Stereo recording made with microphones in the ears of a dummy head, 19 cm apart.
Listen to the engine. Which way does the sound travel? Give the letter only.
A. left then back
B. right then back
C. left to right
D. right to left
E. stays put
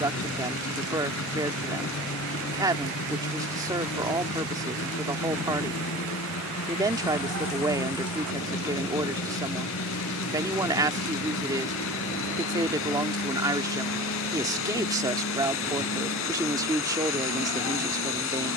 E.